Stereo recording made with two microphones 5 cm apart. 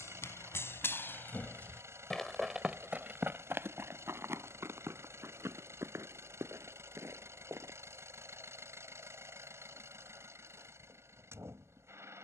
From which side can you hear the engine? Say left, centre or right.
right.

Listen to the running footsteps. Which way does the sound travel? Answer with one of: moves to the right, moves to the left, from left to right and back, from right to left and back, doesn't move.
moves to the right.